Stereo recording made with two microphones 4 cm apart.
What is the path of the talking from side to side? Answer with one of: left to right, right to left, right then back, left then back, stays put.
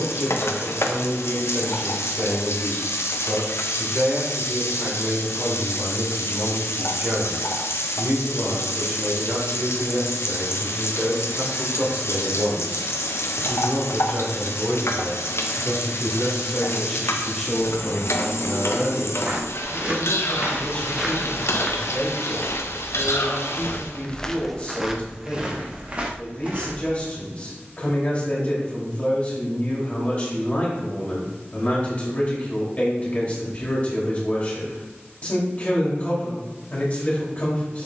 right to left.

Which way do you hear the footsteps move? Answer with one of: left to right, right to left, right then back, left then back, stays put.
left then back.